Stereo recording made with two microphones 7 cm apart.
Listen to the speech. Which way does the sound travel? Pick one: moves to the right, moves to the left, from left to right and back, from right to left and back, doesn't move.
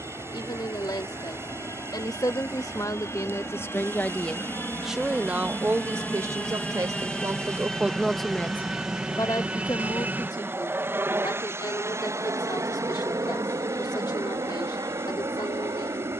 from left to right and back.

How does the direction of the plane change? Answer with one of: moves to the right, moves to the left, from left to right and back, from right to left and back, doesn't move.
moves to the right.